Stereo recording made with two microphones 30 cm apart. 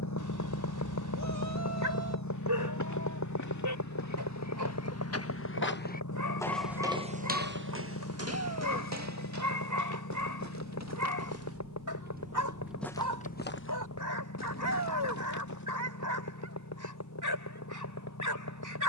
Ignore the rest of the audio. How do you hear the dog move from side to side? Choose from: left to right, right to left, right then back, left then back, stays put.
stays put.